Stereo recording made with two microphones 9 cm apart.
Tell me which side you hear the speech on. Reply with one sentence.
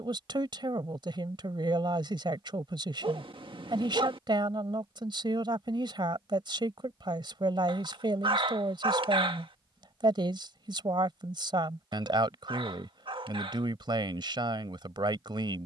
You can hear the speech on the right.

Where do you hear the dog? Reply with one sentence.
In this clip you hear the dog on the right.